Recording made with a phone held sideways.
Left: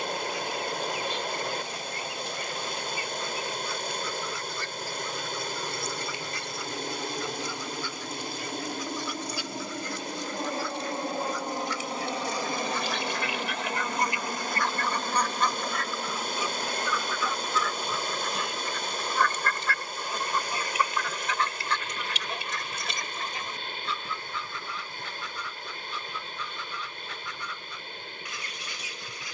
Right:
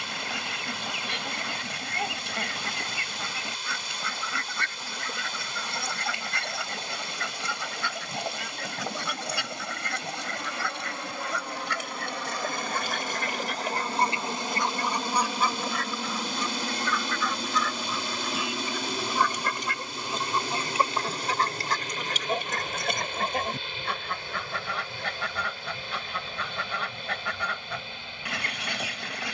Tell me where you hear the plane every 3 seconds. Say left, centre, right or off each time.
left, left, left, left, centre, right, right, right, right, right.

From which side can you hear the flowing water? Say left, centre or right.
left.